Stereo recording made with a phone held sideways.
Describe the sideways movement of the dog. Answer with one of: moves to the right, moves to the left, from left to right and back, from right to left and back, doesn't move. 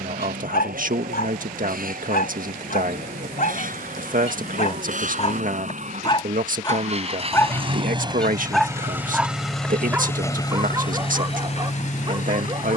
moves to the right.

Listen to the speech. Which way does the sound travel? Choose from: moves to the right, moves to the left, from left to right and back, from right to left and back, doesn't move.
doesn't move.